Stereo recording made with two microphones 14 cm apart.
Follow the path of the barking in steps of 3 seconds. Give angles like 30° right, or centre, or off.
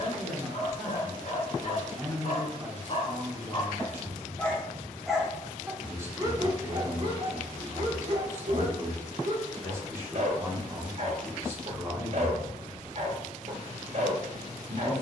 50° left, 10° left, 40° right, 50° right, 50° right.